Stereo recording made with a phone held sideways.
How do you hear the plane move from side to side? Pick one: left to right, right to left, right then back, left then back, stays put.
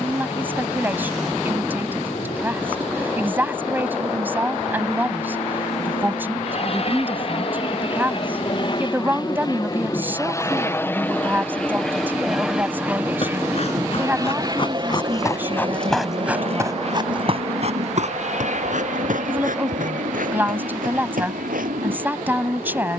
left to right.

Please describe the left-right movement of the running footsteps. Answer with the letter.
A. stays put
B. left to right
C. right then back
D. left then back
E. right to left
B.